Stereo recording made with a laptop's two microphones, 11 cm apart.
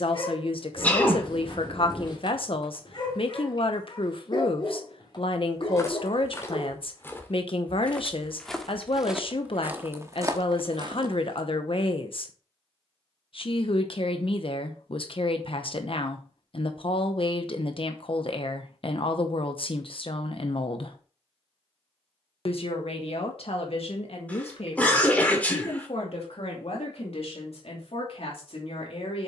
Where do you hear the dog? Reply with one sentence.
In this clip you hear the dog on the left.